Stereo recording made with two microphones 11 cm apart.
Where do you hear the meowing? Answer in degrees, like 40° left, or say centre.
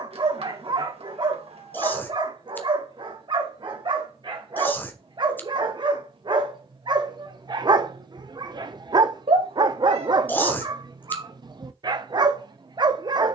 60° right.